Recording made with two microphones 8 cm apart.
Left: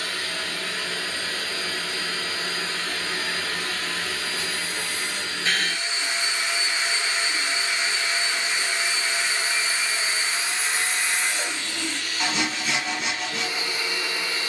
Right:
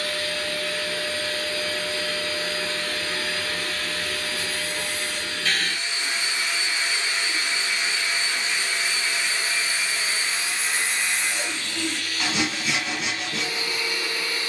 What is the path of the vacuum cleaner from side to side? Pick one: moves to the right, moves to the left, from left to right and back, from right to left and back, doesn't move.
doesn't move.